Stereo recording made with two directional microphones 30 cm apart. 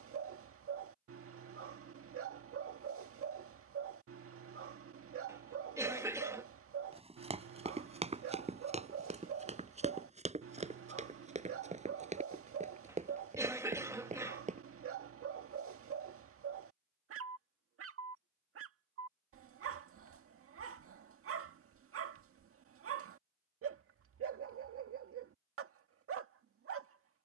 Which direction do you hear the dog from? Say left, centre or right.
right.